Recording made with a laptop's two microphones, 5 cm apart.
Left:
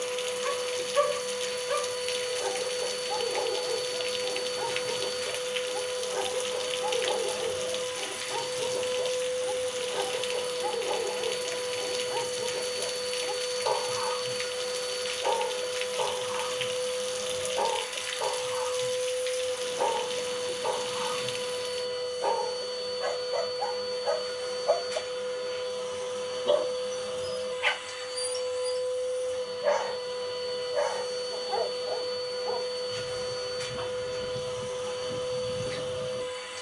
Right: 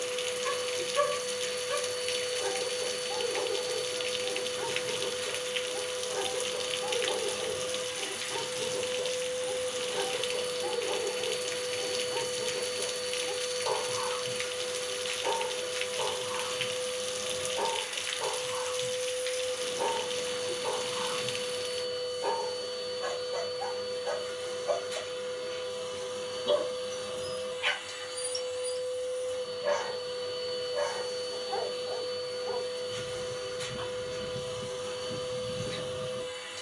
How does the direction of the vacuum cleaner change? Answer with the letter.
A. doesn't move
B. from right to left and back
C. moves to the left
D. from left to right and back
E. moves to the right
A.